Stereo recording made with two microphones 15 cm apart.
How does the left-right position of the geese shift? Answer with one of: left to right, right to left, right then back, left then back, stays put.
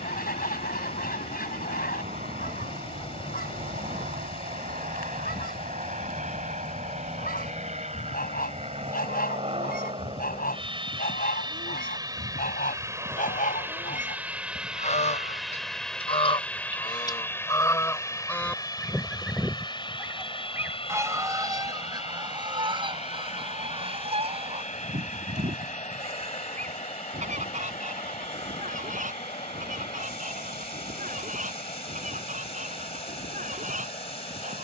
left to right.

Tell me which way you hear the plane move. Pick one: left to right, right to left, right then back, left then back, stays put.
right to left.